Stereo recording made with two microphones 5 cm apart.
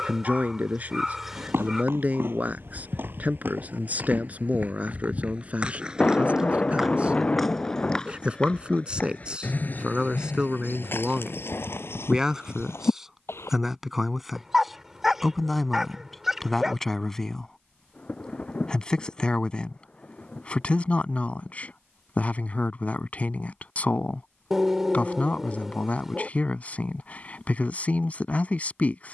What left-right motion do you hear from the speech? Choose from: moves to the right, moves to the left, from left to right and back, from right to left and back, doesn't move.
moves to the left.